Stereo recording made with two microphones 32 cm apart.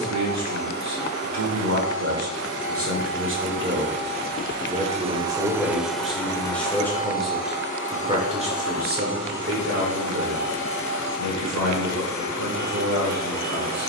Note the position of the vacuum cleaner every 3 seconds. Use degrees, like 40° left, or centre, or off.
50° right, 20° right, 30° left, 60° left, 60° left.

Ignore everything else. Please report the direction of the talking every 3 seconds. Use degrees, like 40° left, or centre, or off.
50° right, 20° right, 10° right, 50° right, 50° right.